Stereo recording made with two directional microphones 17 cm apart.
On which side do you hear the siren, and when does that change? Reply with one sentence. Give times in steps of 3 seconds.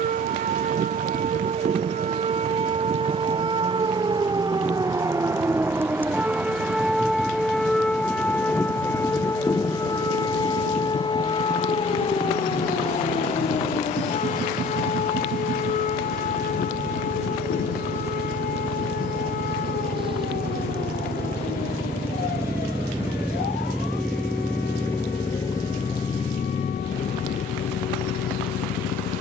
In this clip you hear the siren on the right from 0 s, in the centre from 6 s and on the left from 9 s.